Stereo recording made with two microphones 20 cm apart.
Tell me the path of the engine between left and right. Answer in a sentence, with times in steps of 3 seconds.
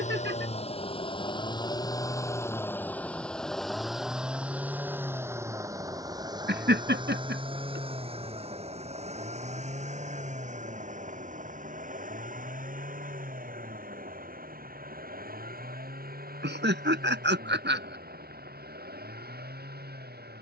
You can hear the engine on the left from 0 s, in the centre from 3 s and on the right from 6 s.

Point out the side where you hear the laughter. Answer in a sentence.
In this clip you hear the laughter on the right.